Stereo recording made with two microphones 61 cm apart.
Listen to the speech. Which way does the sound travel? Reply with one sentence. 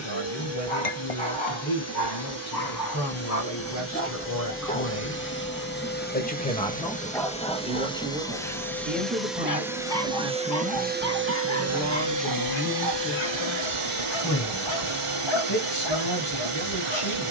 In this clip you hear the speech go right and come back.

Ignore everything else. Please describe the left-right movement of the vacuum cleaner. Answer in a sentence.
In this clip you hear the vacuum cleaner move to the right.